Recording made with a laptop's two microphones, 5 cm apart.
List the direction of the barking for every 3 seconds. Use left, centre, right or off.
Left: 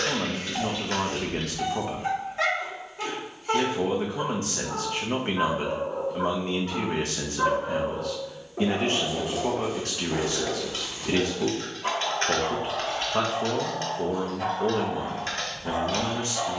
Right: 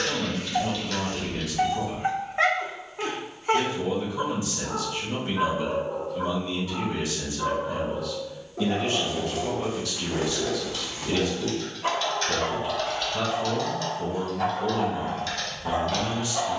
right, centre, left, centre, right, right.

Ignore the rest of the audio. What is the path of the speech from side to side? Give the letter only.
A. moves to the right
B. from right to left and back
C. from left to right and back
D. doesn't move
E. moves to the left
D.